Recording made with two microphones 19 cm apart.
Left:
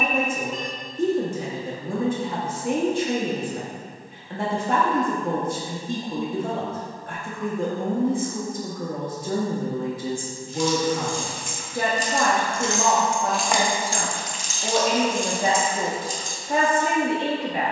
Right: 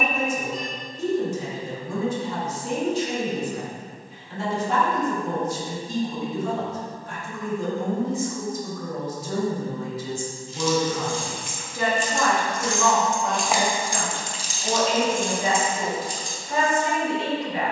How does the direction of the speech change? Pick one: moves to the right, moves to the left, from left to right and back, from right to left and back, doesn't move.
doesn't move.